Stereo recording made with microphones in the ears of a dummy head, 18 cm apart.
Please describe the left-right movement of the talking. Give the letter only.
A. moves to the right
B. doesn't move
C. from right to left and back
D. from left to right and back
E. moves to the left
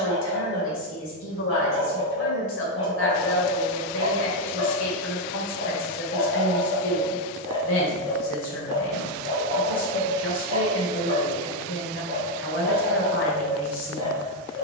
B.